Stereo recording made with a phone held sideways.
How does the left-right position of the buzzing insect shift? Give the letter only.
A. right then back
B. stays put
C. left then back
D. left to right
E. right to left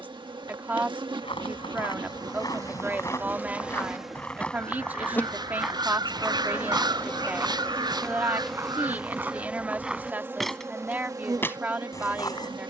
C.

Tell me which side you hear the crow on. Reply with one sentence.
You can hear the crow on the right.